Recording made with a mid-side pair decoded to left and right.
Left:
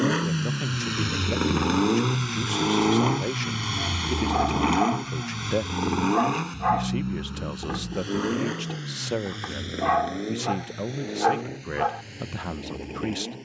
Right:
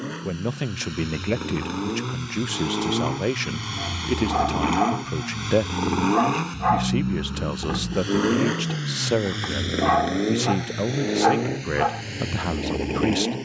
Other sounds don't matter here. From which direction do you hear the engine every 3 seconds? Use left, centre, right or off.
left, centre, right, right, right.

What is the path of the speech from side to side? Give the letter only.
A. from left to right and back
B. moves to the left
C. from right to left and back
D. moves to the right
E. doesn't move
E.